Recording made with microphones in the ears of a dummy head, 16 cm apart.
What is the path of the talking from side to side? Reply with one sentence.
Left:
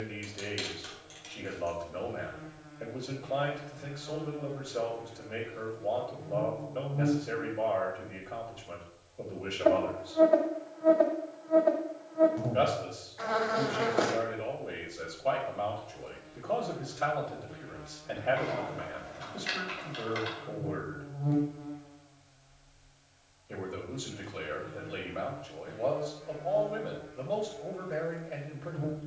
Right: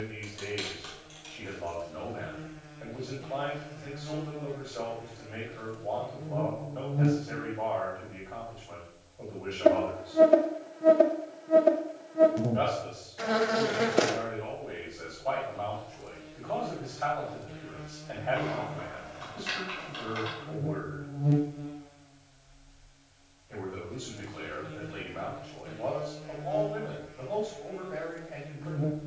You can hear the talking stay in one place.